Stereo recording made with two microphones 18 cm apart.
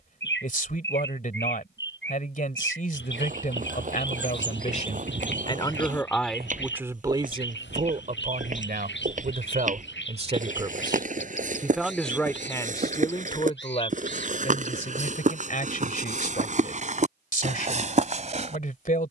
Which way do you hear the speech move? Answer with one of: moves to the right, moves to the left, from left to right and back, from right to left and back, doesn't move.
from left to right and back.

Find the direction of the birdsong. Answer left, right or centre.
left.